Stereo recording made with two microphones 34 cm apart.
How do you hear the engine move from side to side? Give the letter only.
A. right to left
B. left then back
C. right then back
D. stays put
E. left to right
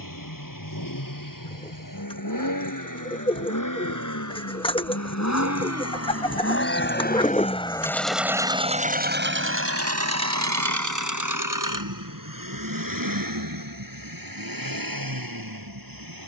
E.